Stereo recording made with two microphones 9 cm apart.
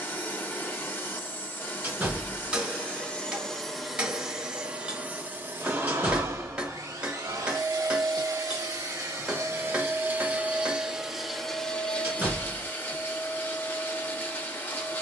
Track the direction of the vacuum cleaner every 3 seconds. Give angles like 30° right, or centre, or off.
20° left, 10° right, 40° right, 20° right, 20° left.